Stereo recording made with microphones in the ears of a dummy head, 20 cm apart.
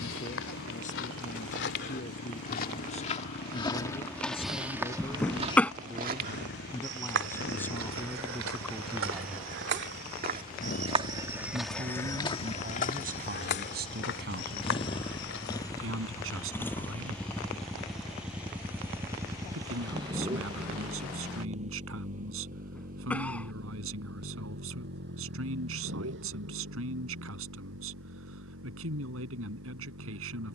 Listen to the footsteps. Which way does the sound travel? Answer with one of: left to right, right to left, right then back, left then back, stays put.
right then back.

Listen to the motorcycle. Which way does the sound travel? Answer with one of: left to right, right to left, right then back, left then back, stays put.
left to right.